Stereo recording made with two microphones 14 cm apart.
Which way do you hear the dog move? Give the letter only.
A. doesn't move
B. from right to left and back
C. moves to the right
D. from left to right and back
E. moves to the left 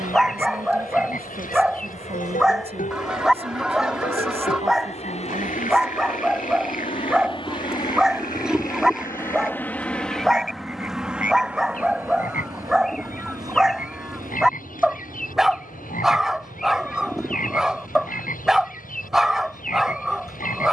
A.